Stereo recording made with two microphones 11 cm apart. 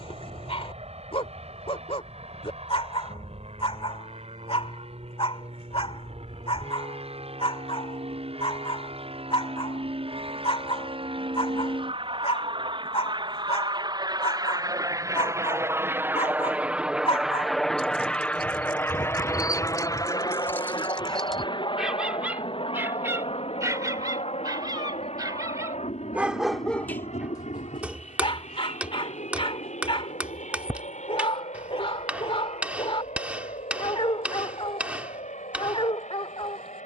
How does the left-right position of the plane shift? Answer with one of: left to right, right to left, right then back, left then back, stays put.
right to left.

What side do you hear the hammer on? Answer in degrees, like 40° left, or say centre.
10° right.